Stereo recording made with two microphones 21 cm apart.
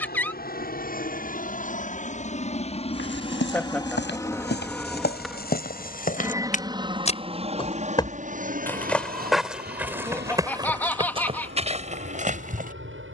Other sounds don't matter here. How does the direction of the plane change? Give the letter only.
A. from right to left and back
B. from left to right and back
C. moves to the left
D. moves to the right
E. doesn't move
D.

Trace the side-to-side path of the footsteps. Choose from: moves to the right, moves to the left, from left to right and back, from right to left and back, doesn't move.
moves to the right.